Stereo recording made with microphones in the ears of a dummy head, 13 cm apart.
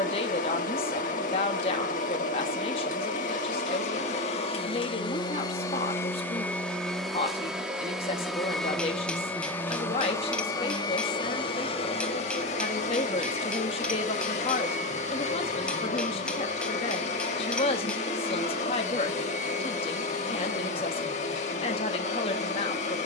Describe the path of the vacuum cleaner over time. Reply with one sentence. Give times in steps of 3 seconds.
In this clip you hear the vacuum cleaner on the left from 0 s, in the centre from 6 s and on the left from 9 s.